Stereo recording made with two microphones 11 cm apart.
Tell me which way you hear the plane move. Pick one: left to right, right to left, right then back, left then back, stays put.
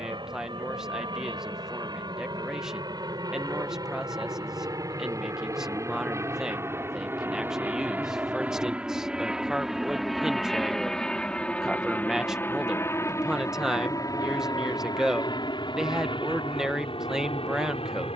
right to left.